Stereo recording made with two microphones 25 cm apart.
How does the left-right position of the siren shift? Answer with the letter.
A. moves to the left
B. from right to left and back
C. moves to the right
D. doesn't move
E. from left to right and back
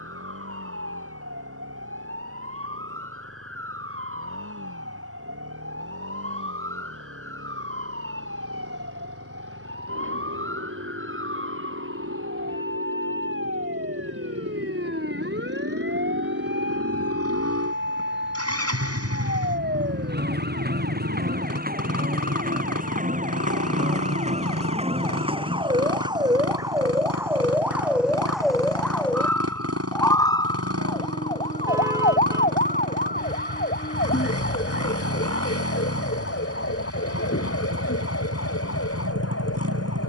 A.